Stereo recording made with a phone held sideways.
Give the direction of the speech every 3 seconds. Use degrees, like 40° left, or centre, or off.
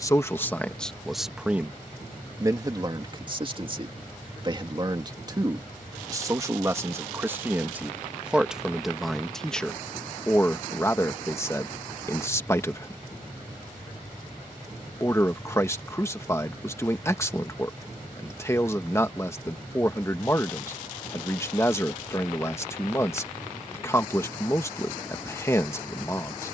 centre, 30° right, 10° right, 10° left, 20° left, 20° left, 20° left, 20° left, 20° left.